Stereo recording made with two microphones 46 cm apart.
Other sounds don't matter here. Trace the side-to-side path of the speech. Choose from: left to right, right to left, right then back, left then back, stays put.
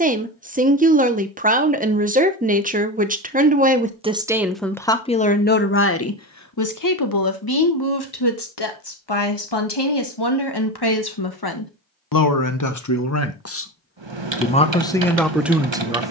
left then back.